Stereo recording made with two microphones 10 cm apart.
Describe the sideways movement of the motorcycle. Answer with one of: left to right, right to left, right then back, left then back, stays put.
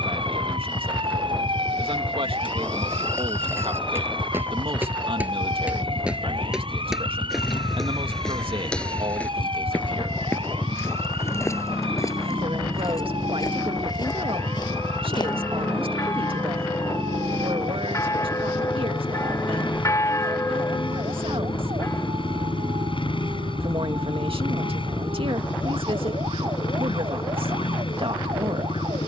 stays put.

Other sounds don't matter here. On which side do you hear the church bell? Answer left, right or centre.
left.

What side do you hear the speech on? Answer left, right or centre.
right.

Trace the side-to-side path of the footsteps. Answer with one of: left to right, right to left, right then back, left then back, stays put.
right to left.